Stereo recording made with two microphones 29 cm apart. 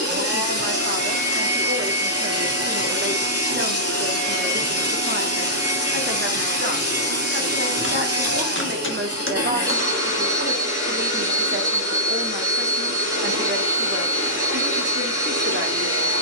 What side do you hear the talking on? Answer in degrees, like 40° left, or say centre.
40° right.